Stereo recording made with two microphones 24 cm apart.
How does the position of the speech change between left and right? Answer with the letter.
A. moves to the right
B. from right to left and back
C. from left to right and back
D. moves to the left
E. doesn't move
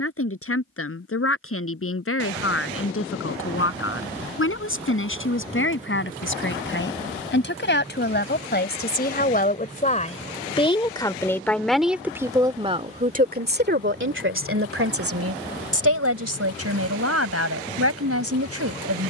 A.